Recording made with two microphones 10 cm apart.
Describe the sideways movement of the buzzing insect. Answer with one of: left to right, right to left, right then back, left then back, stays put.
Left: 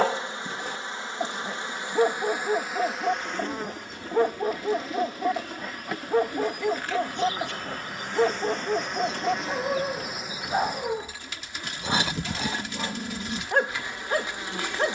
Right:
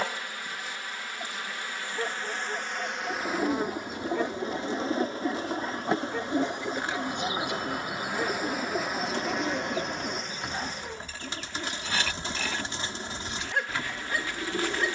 right then back.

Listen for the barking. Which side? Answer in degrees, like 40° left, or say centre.
50° left.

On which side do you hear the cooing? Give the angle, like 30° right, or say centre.
30° right.